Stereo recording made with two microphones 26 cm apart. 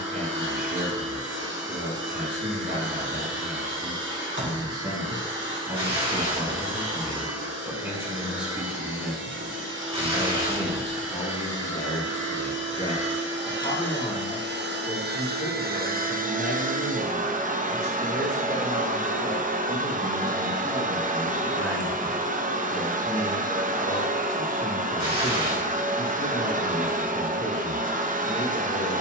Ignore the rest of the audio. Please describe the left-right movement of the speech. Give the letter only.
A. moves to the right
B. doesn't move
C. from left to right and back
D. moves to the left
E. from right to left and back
D.